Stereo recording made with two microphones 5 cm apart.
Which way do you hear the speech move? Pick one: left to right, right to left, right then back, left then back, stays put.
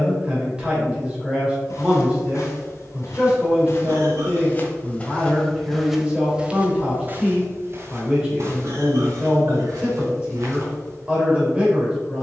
stays put.